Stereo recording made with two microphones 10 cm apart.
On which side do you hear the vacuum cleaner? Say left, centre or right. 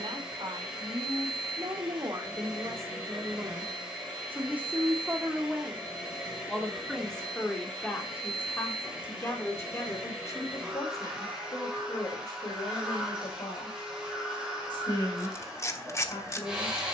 centre.